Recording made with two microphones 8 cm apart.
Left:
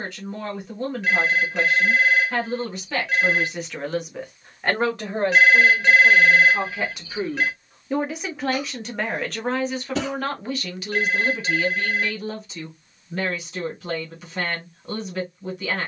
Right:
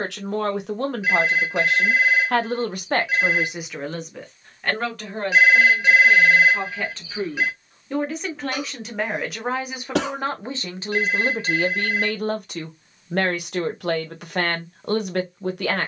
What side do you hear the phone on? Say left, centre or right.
centre.